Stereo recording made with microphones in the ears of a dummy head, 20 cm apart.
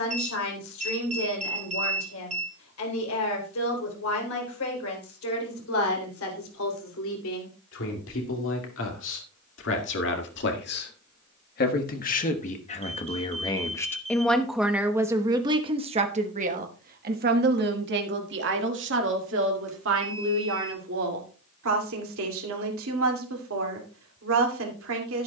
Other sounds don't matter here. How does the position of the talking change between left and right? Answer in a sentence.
You can hear the talking move from left to right.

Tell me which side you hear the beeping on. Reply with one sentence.
You can hear the beeping on the right.